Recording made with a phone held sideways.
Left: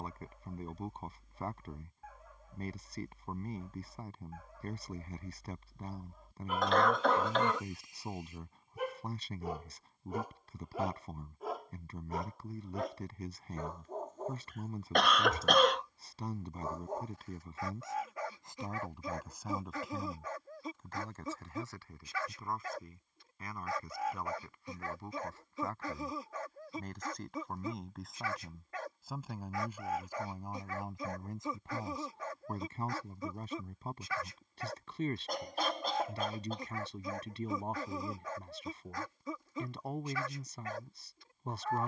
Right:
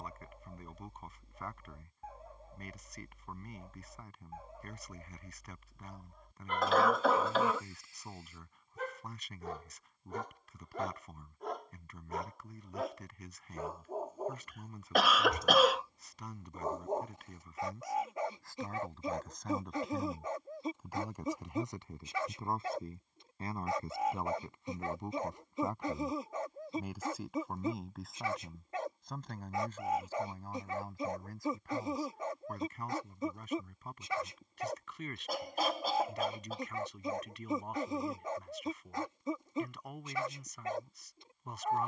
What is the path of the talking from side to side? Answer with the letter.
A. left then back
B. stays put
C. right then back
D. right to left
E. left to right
C.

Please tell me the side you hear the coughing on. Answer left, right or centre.
centre.